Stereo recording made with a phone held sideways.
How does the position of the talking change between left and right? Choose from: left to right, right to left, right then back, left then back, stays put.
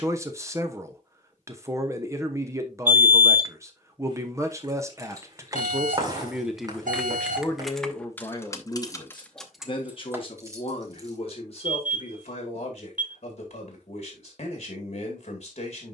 right to left.